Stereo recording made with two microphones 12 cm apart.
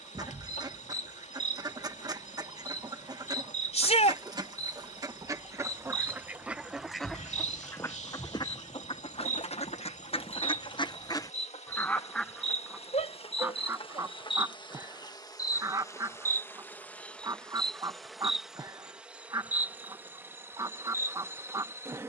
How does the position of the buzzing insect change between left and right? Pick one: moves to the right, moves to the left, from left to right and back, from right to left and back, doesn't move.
moves to the right.